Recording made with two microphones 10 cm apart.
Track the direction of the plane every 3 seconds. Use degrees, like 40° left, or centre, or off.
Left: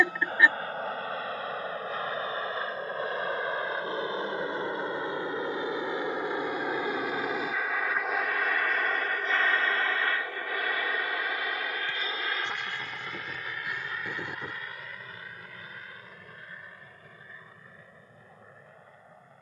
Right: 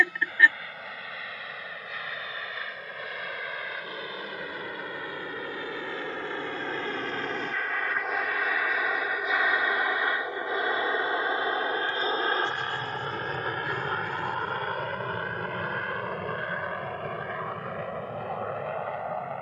40° left, 30° left, 10° left, 20° right, 40° right, 60° right, 70° right.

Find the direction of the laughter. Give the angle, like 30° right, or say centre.
20° left.